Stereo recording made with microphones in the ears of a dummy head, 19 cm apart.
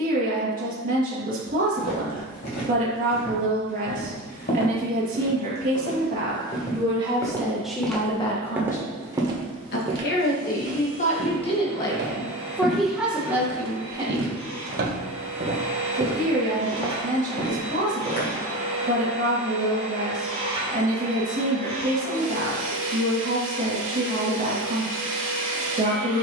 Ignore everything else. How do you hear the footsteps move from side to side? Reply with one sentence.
In this clip you hear the footsteps go right and come back.